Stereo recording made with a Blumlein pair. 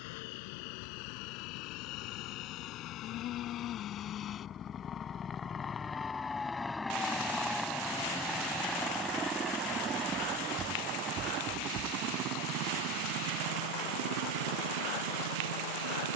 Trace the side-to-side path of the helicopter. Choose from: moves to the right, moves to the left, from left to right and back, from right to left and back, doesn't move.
moves to the right.